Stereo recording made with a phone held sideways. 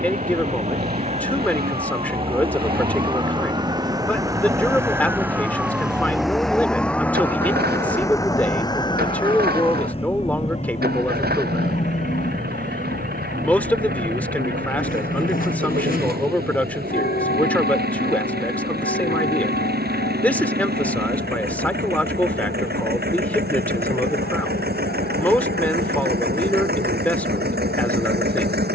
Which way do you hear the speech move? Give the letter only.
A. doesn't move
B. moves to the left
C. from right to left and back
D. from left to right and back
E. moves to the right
A.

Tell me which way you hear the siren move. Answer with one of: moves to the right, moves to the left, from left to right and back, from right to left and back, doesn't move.
moves to the left.